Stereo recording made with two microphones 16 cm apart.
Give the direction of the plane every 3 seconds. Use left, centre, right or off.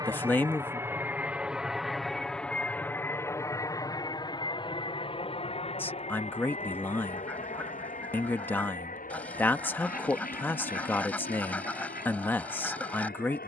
centre, left, left, left, left.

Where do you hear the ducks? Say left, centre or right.
centre.